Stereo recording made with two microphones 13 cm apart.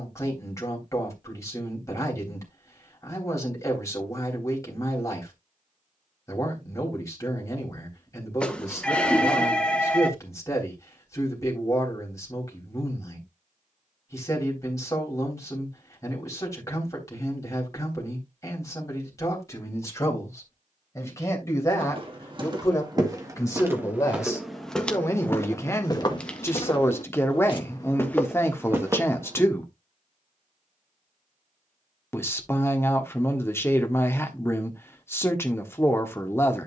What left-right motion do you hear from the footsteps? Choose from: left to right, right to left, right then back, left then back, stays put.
left then back.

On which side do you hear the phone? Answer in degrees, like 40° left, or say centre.
10° left.